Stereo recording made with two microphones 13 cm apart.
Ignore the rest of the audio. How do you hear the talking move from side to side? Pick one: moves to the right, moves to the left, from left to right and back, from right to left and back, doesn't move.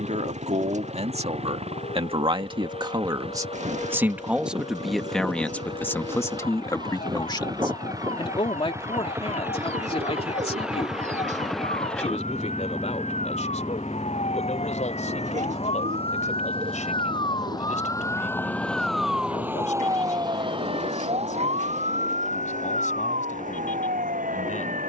moves to the left.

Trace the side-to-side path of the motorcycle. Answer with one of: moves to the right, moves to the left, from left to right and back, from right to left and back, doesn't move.
moves to the left.